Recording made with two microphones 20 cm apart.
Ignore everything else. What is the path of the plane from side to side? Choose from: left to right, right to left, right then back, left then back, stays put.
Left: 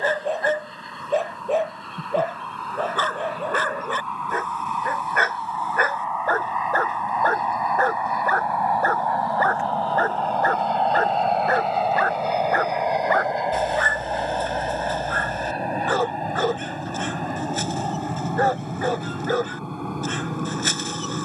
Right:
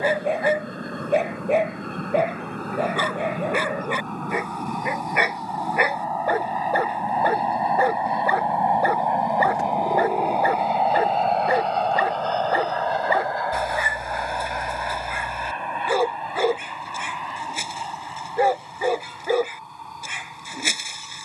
right to left.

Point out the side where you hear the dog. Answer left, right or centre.
centre.